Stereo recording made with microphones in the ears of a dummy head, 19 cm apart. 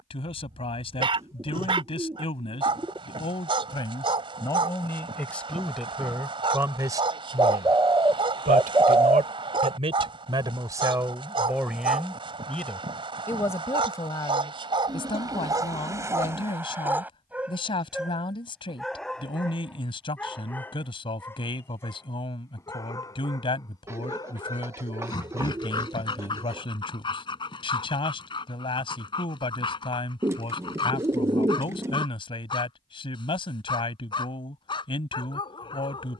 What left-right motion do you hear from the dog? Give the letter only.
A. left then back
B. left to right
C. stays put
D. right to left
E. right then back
D.